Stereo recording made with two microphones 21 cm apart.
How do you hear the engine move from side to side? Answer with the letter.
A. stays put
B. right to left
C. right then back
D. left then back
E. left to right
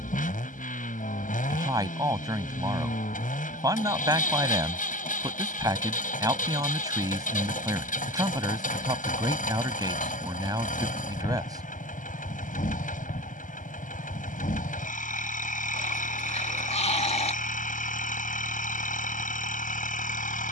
A.